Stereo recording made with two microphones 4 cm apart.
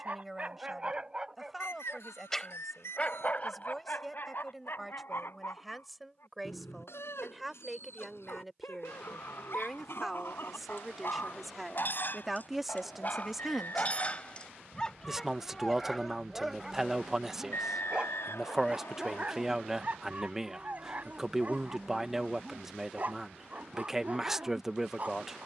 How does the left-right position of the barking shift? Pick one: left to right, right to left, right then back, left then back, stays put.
left then back.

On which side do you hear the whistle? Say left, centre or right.
left.